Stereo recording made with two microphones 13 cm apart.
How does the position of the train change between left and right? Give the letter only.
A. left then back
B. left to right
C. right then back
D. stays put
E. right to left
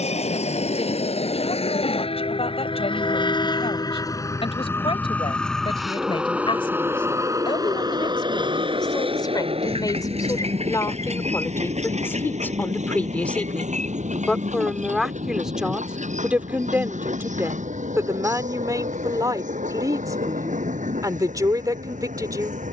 B.